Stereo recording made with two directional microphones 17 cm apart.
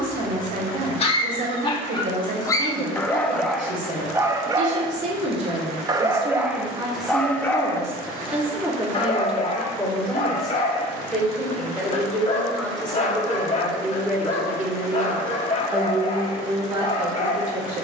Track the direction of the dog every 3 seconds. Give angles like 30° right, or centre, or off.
30° left, 20° right, 10° left, 40° left, 40° left, 40° left.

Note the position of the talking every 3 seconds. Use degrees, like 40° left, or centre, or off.
50° right, 50° right, 20° right, centre, centre, 30° right.